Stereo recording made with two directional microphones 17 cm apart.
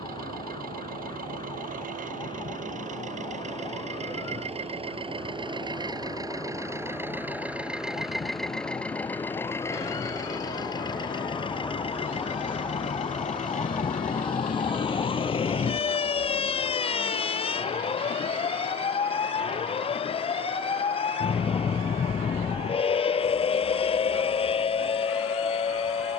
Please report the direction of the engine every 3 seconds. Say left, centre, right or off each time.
right, right, centre, left, left, left, left, left, left.